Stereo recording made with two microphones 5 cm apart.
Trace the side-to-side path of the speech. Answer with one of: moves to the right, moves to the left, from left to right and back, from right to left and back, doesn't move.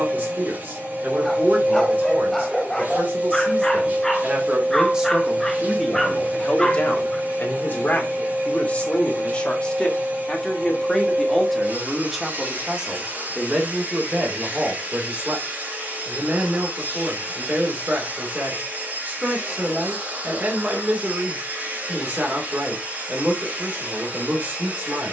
from right to left and back.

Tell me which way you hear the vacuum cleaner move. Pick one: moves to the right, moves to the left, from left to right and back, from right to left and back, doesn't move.
doesn't move.